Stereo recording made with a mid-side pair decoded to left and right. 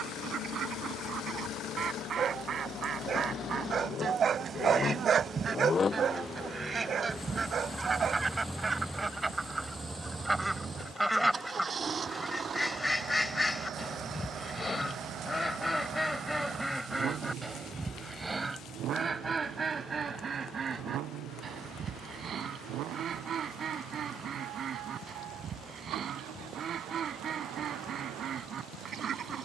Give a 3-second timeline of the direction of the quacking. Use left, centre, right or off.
right, right, right, centre, centre, centre, right, right, right, right.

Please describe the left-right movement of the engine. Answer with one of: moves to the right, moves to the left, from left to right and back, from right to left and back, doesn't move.
moves to the right.